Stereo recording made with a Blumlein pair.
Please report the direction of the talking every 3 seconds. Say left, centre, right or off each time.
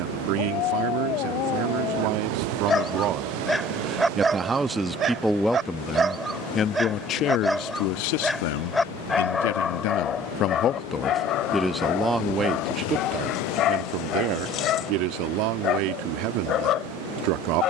right, centre, left, left, right, right.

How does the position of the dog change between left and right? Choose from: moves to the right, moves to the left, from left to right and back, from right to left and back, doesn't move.
from left to right and back.